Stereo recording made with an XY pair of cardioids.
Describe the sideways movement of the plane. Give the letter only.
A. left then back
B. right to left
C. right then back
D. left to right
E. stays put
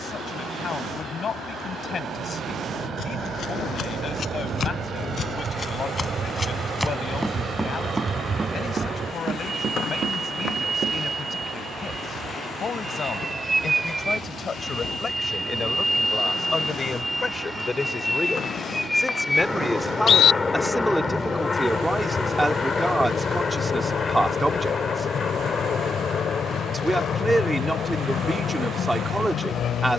B.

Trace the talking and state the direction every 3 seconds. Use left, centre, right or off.
left, left, left, left, left, left, centre, centre, centre, centre.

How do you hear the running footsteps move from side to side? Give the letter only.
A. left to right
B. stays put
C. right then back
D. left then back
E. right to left
A.